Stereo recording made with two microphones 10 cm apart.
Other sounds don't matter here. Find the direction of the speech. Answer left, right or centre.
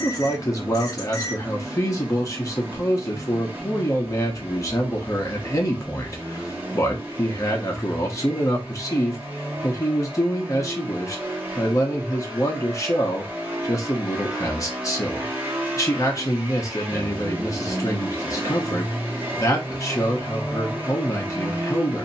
left.